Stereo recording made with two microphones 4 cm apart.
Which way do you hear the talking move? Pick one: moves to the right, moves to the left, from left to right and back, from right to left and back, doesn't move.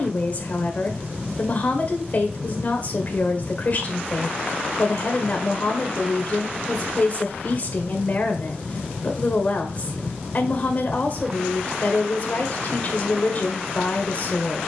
doesn't move.